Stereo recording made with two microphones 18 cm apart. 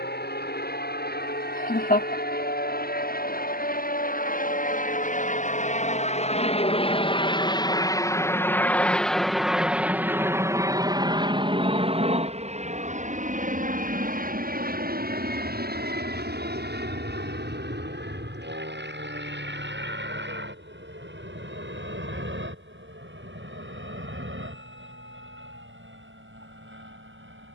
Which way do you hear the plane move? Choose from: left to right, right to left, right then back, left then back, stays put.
left to right.